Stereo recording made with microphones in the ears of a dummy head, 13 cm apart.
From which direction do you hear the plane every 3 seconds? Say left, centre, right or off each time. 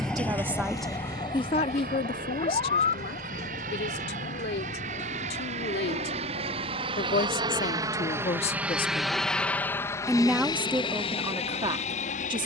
right, right, right, left.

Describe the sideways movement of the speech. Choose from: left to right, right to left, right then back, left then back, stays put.
left then back.